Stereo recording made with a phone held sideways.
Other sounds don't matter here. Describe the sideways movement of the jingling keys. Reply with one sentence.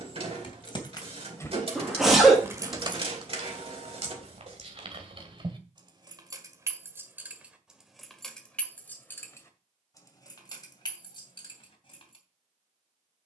In this clip you hear the jingling keys move from left to right and back again.